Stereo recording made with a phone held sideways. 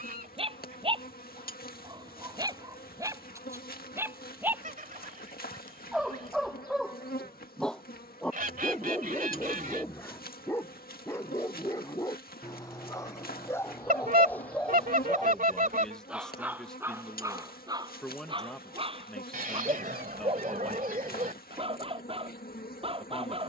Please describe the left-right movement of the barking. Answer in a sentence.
You can hear the barking move from right to left and back again.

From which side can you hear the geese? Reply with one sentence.
In this clip you hear the geese on the right.